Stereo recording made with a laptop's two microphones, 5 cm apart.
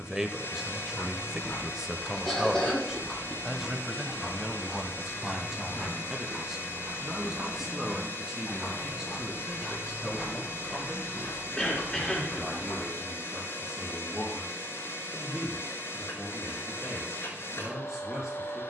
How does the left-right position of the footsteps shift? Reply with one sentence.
You can hear the footsteps move from left to right and back again.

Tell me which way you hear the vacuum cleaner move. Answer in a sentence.
In this clip you hear the vacuum cleaner stay put.